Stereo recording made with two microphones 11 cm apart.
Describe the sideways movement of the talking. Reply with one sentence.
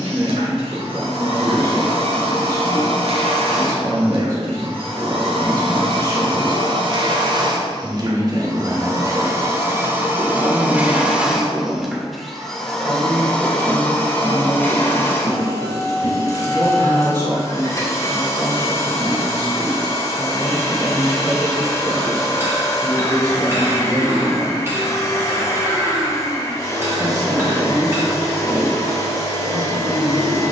You can hear the talking stay in one place.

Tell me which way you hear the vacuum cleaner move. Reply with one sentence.
In this clip you hear the vacuum cleaner go from the right side to the left.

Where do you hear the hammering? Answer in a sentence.
In this clip you hear the hammering on the right.